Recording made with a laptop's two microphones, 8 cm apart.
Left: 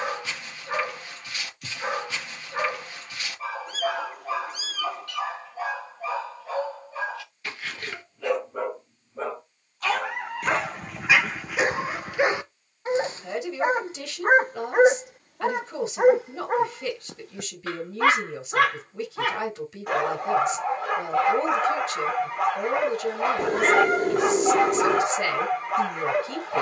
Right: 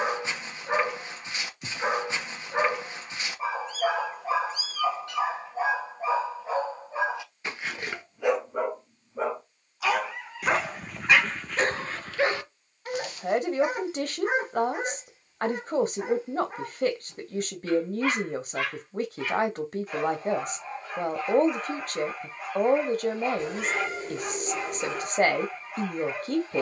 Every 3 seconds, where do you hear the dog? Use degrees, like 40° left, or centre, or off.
20° right, 20° right, 20° right, centre, 30° left, 70° left, 70° left, 70° left, 70° left.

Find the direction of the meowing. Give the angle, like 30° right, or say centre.
60° left.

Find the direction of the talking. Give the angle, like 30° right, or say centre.
50° right.